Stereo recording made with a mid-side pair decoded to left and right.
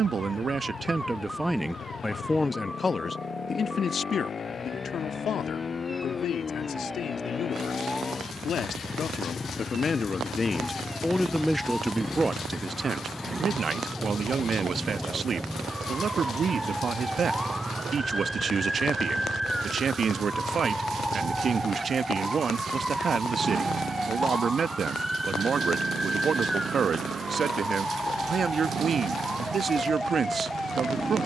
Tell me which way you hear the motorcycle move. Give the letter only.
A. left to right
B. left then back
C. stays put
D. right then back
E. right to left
A.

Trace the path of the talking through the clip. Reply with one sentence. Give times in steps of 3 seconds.
You can hear the talking in the centre from 0 s, on the left from 3 s and on the right from 12 s.